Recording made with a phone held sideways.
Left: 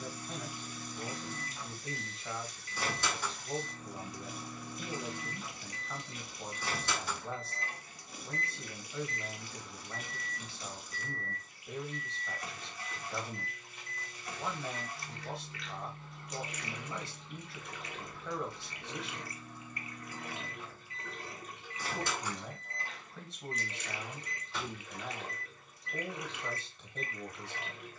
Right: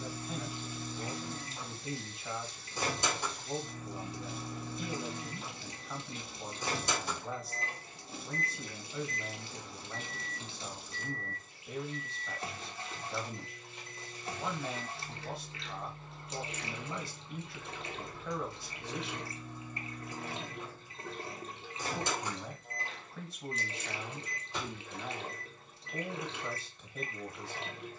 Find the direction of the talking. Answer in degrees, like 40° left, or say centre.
centre.